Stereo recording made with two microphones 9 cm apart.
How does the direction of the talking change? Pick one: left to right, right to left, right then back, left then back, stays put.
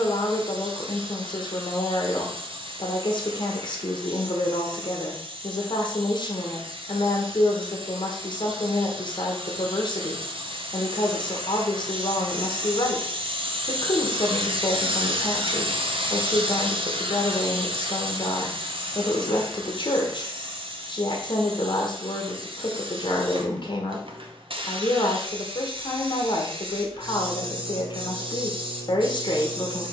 stays put.